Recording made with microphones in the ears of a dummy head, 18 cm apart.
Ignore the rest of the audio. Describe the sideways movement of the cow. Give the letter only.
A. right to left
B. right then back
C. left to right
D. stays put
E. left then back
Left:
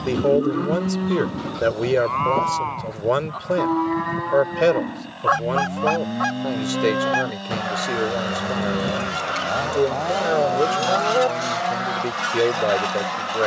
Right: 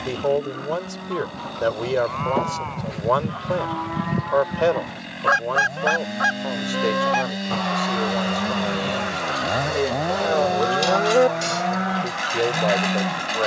C.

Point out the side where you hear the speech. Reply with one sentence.
You can hear the speech on the left.